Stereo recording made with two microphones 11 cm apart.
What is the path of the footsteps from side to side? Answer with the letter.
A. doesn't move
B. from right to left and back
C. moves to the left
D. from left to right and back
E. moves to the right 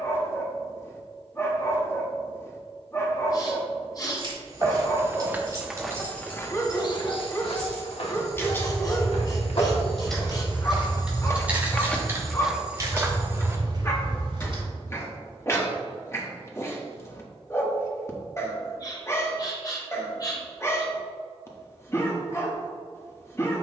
B.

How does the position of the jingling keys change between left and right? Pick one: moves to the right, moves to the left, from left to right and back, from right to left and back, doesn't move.
from right to left and back.